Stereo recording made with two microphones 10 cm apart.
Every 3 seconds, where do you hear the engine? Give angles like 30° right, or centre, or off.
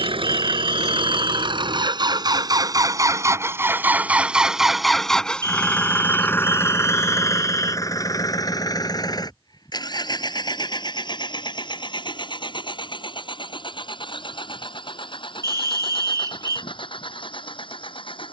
60° right, 10° right, 30° left, 50° left, 60° left, 60° left.